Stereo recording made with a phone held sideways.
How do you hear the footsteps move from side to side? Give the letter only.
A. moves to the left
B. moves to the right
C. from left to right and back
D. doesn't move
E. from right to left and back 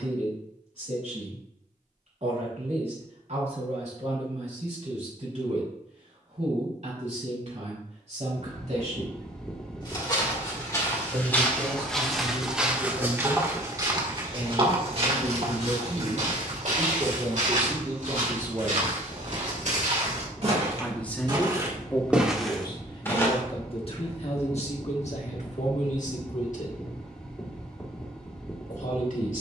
C.